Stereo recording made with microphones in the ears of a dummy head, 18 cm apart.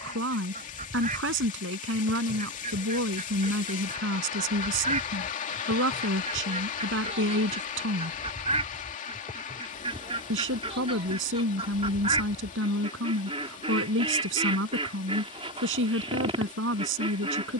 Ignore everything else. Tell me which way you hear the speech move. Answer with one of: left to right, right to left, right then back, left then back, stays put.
stays put.